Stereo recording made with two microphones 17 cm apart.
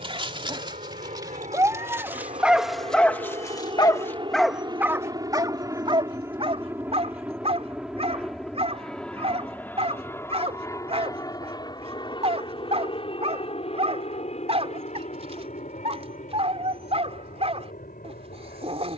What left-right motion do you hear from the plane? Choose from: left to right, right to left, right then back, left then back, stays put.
right to left.